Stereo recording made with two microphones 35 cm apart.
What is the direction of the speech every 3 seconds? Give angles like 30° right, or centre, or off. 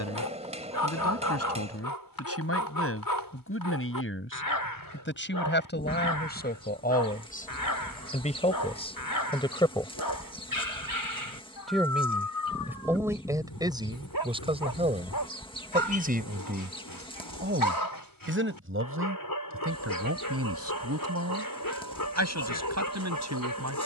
40° left, 30° left, 20° left, 10° left, 10° right, 30° right, 40° right, 50° right.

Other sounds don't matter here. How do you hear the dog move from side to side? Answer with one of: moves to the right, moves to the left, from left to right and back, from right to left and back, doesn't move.
doesn't move.